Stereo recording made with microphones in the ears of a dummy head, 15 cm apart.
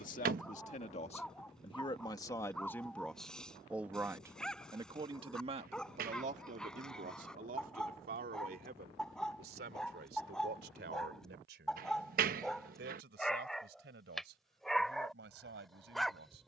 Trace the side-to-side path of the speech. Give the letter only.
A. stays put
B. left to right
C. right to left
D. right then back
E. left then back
B.